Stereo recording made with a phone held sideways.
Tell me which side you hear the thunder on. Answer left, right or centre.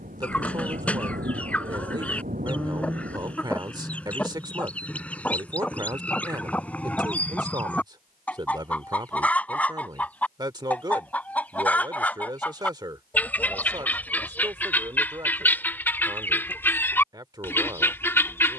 right.